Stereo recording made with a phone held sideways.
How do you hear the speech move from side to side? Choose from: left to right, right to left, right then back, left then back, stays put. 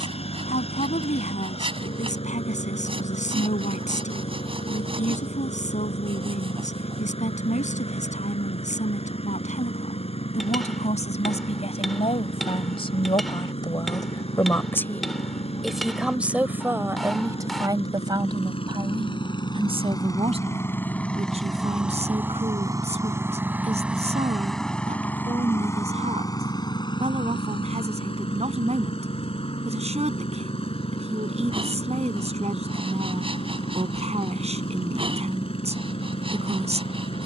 left to right.